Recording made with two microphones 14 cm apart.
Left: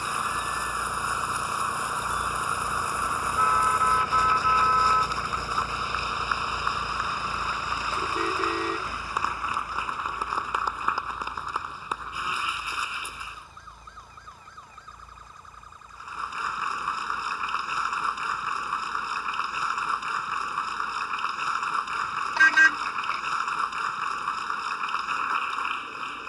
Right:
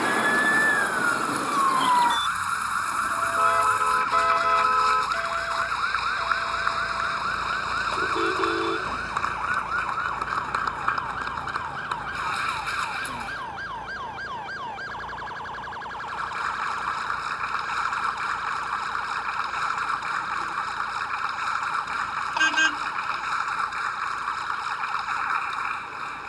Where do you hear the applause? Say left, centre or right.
centre.